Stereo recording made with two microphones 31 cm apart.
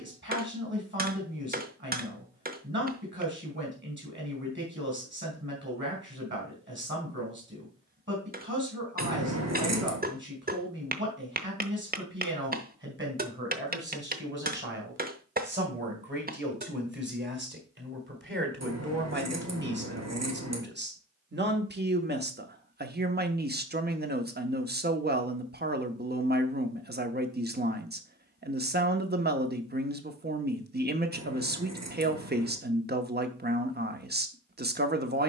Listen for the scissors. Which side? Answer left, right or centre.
right.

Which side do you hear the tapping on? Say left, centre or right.
right.